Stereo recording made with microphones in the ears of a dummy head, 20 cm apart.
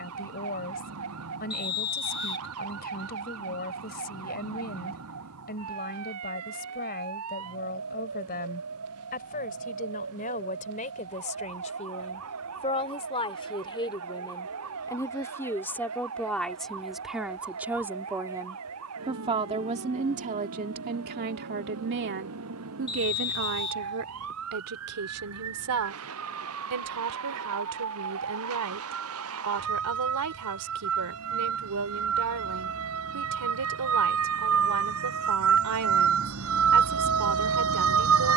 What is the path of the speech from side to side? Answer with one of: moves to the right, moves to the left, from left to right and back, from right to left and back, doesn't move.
moves to the right.